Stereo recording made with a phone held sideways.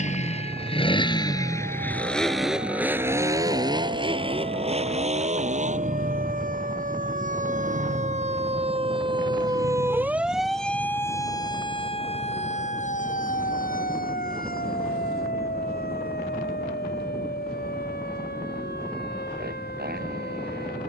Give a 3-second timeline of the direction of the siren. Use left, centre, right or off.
right, right, right, centre, left, left, left.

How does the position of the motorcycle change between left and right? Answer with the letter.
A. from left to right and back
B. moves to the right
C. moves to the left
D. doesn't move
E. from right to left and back
B.